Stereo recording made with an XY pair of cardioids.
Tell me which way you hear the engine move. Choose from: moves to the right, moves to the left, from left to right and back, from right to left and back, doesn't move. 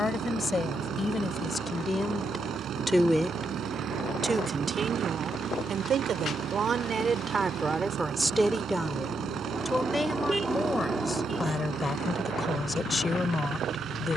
doesn't move.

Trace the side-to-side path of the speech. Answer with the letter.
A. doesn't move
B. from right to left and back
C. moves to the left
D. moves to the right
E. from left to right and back
E.